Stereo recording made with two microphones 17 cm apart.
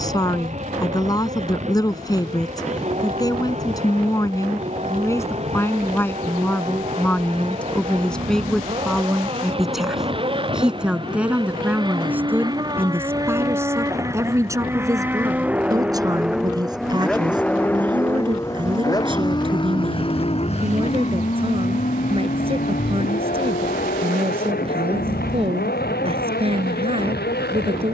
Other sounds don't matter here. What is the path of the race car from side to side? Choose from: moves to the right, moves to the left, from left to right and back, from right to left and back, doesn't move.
moves to the left.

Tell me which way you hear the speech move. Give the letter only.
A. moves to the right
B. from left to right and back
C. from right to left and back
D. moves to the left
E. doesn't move
A.